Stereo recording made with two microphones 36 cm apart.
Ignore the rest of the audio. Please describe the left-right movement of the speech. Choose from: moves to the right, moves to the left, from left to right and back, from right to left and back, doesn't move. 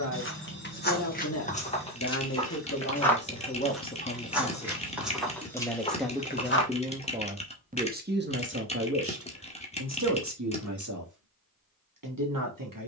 moves to the right.